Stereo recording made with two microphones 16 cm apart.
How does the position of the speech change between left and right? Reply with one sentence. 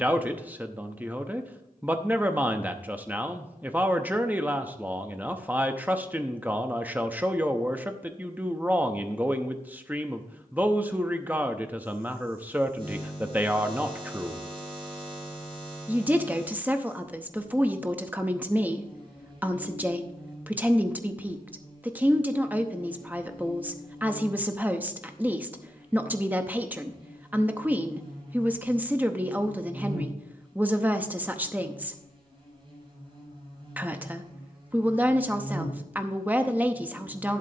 In this clip you hear the speech stay in one place.